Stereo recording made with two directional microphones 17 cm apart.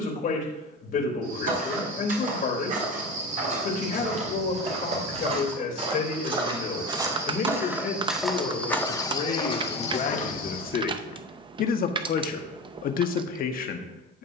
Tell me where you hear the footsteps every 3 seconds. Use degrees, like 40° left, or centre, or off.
50° right, 40° right, 10° right, 40° left, off.